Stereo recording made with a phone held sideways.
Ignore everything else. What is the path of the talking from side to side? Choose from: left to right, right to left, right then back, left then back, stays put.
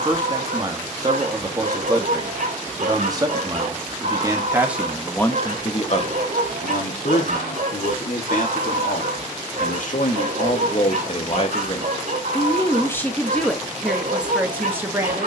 left then back.